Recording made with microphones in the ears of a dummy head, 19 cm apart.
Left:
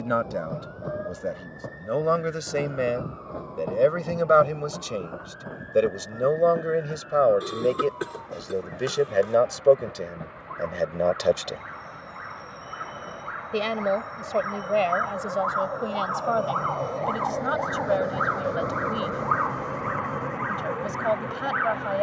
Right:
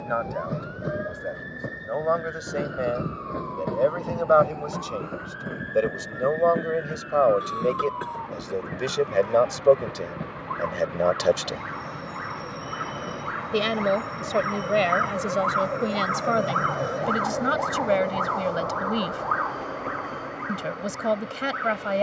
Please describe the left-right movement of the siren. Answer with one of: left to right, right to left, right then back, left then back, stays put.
right to left.